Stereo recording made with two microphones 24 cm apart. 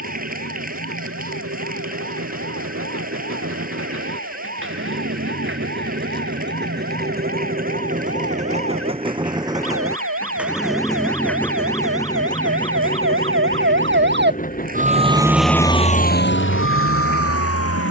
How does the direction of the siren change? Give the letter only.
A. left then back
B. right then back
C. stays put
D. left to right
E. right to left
E.